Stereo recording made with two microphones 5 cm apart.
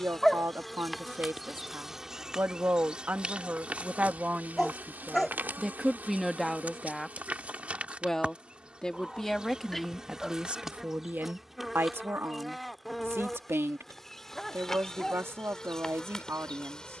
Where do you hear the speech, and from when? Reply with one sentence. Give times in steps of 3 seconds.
In this clip you hear the speech on the right from 0 s, in the centre from 6 s and on the right from 9 s.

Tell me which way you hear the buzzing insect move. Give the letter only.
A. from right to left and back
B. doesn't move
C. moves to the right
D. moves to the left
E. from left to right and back
E.